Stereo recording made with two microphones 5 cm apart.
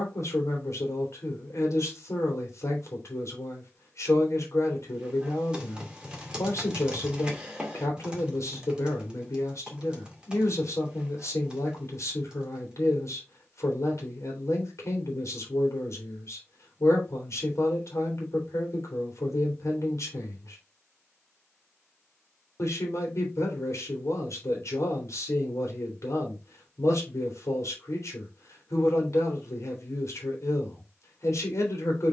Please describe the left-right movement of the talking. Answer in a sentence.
You can hear the talking stay in one place.